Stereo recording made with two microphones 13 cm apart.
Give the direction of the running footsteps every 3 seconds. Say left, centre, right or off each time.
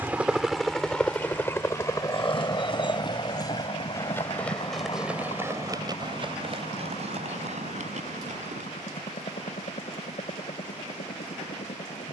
left, centre, right, off.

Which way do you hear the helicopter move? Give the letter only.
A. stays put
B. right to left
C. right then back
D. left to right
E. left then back
B.